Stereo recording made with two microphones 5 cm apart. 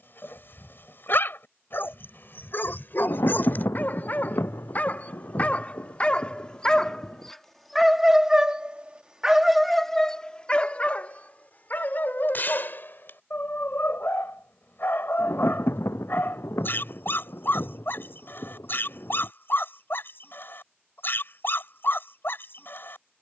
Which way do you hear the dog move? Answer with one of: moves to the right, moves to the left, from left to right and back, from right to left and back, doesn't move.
from left to right and back.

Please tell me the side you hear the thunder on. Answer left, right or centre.
left.